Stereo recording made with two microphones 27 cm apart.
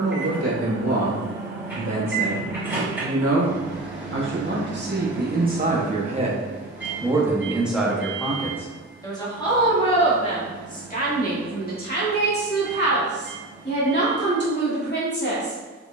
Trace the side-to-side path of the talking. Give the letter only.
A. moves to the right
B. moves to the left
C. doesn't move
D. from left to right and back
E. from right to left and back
B.